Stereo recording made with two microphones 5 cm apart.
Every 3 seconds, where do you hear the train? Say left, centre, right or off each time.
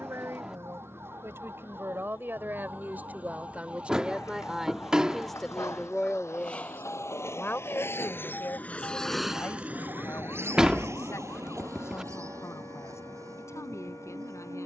left, left, left, right, right.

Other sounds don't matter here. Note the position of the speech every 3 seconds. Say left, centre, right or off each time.
right, centre, left, left, left.